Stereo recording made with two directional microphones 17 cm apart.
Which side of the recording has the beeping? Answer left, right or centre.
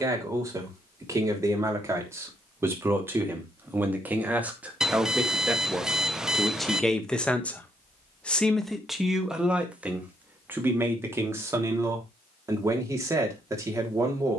centre.